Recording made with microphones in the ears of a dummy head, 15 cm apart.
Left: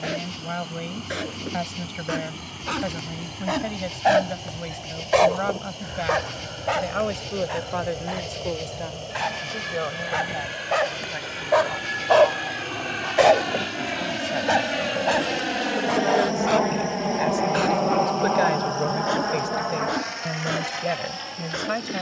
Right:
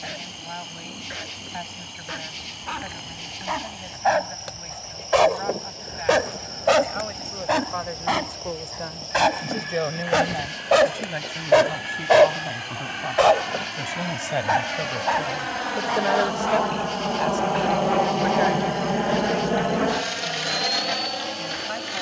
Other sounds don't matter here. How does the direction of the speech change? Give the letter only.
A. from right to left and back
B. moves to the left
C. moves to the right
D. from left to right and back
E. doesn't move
D.